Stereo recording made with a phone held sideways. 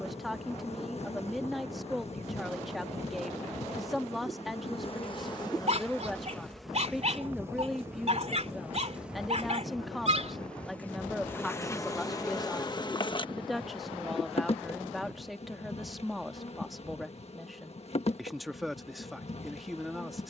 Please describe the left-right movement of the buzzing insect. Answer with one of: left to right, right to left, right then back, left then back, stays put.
right then back.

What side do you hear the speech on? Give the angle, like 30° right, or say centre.
centre.